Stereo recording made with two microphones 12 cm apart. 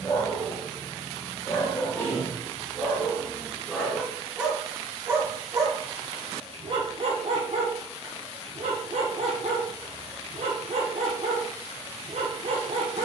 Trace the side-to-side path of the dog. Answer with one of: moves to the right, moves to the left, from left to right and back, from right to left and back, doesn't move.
moves to the right.